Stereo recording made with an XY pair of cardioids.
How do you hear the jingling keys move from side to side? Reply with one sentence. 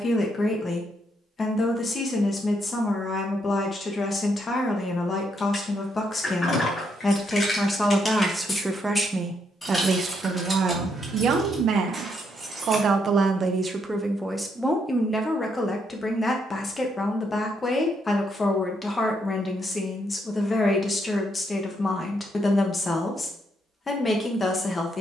You can hear the jingling keys move from left to right.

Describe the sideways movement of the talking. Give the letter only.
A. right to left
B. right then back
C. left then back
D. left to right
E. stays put
B.